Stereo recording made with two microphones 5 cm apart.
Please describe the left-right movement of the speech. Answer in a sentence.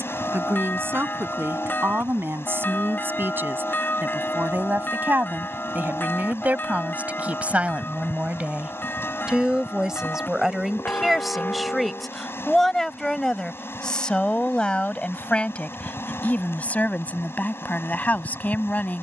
You can hear the speech travel towards the left.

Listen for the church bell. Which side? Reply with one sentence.
You can hear the church bell on the left.